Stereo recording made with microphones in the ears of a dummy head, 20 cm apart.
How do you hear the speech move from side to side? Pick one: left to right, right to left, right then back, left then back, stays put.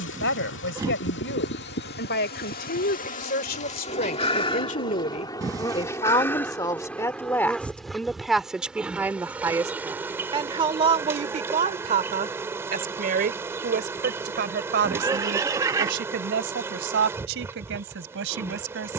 left to right.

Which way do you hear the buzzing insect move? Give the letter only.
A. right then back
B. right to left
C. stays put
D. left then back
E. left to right
E.